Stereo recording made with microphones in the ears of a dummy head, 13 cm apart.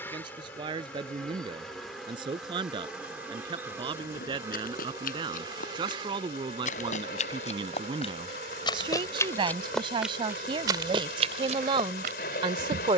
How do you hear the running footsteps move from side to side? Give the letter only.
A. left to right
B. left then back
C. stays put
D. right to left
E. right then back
A.